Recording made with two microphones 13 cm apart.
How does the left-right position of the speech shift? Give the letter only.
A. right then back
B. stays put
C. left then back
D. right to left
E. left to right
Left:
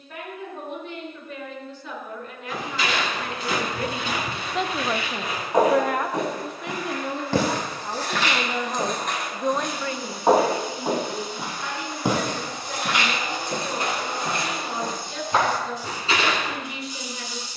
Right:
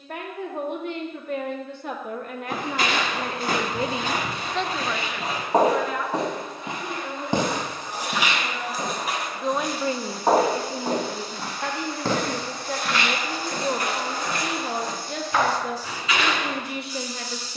C.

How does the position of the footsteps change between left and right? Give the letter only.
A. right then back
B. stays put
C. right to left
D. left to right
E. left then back
C.